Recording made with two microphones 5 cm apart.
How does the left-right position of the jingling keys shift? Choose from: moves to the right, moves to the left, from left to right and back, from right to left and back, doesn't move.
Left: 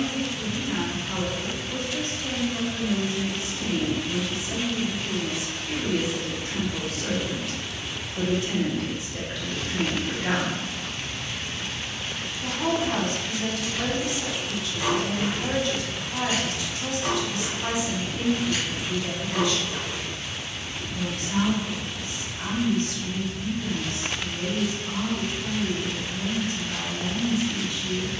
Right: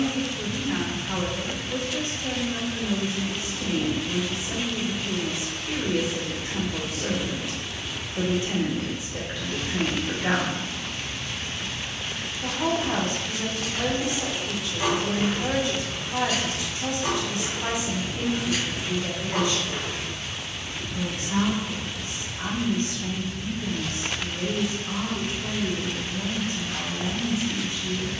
from right to left and back.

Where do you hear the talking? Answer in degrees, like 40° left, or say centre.
20° right.